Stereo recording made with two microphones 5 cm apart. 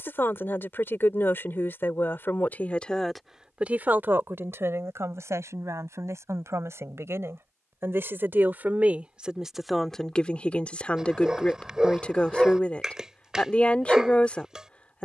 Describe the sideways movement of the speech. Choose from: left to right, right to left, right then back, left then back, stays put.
right then back.